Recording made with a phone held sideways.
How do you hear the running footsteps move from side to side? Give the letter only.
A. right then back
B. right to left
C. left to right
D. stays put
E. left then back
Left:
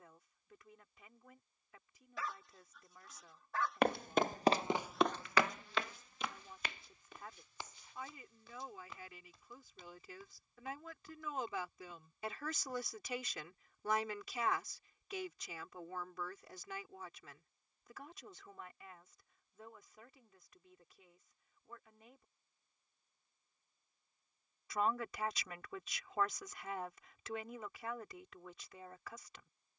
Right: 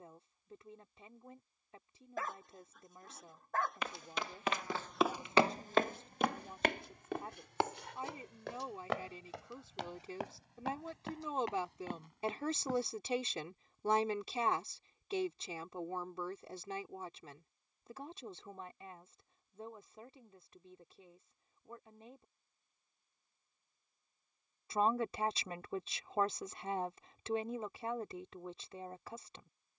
C.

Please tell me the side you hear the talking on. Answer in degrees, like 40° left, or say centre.
30° right.